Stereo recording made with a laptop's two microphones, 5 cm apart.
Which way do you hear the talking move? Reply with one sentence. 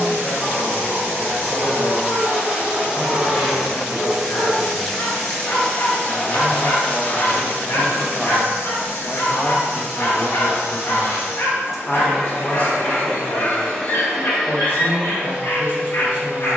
You can hear the talking go right and come back.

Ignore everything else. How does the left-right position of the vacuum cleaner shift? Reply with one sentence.
In this clip you hear the vacuum cleaner move from right to left and back again.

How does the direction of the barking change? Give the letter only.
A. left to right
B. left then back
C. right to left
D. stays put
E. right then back
D.